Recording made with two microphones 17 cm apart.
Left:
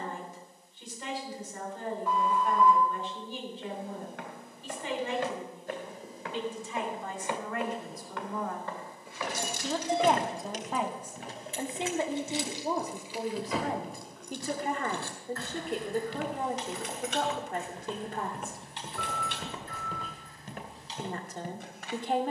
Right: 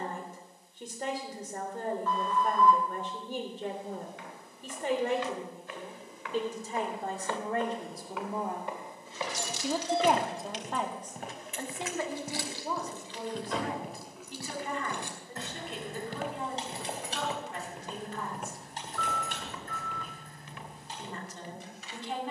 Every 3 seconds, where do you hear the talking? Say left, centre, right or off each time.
right, right, right, centre, left, left, left, left.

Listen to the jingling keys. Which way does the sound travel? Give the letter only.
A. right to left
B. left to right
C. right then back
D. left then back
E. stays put
B.